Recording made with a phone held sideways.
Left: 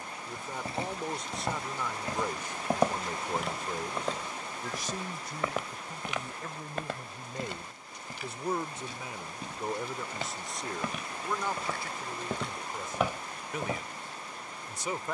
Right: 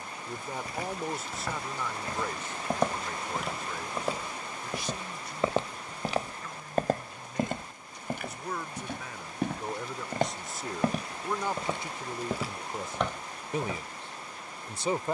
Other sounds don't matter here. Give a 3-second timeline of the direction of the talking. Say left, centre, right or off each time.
centre, left, left, centre, right.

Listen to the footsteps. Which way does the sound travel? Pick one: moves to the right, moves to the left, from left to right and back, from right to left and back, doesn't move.
from left to right and back.